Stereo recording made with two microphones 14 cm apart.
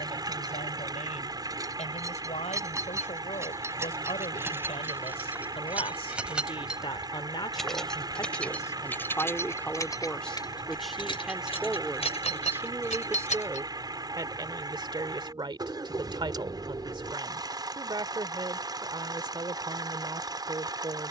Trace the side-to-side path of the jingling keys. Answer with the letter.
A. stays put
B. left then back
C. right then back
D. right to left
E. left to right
D.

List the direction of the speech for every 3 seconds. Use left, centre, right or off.
left, left, left, centre, right, right, right.